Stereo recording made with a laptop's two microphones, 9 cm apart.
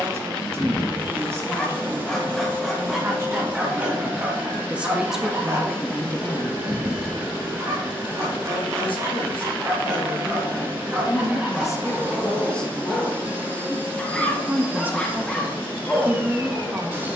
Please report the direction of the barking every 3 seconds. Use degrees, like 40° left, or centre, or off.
10° left, 20° right, 40° right, 20° right, 10° left, 10° left.